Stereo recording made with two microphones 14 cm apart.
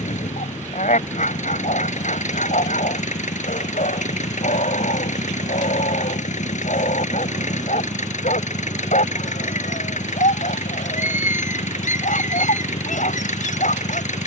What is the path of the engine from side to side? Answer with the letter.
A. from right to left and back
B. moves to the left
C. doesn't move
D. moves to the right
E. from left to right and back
C.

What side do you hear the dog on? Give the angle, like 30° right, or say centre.
80° left.